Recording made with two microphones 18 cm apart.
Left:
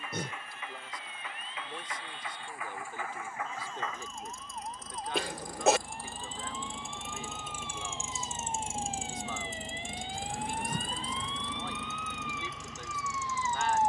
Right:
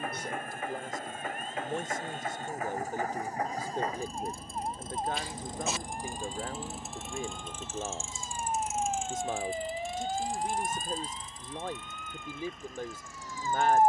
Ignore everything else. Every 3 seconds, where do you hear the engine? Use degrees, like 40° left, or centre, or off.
50° right, 30° right, 10° left, 50° left, 70° left.